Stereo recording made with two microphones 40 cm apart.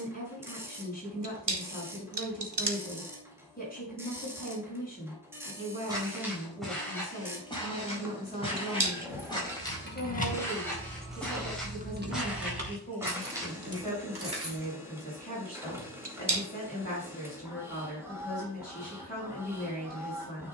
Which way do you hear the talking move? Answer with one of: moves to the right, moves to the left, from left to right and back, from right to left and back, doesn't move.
doesn't move.